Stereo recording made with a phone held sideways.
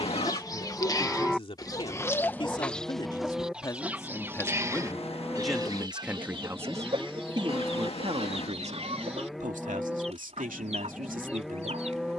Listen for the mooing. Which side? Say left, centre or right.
centre.